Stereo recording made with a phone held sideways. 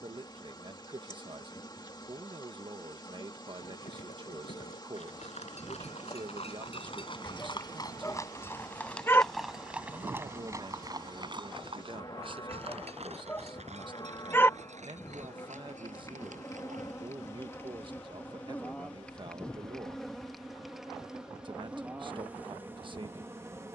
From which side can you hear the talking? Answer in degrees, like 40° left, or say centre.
40° right.